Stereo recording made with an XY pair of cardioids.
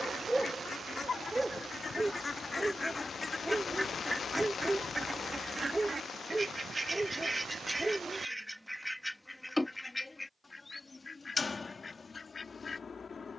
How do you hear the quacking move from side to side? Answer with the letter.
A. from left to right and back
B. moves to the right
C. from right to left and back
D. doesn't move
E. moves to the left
A.